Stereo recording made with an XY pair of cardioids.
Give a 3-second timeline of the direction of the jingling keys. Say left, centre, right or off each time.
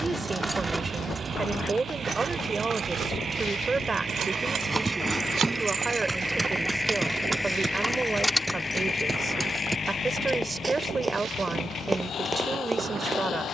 right, right, centre, off, off.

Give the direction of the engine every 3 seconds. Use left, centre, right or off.
right, right, centre, left, left.